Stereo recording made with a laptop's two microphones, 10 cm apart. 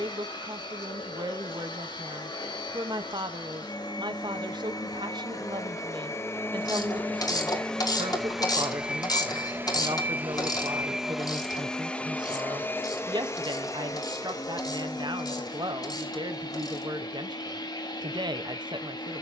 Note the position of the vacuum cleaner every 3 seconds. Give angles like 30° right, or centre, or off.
60° left, 50° left, 10° left, 10° right, 30° left, 50° left, 50° left.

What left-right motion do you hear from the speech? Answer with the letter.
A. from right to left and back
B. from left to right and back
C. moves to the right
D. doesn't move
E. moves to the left
D.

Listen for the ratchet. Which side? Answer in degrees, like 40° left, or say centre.
50° left.